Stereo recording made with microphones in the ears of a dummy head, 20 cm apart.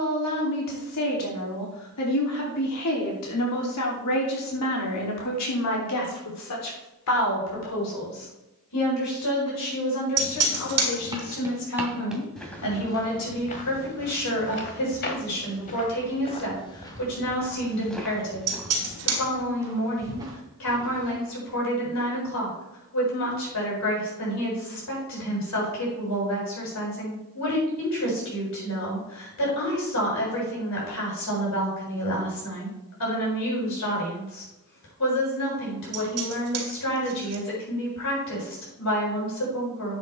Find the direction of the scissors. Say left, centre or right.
right.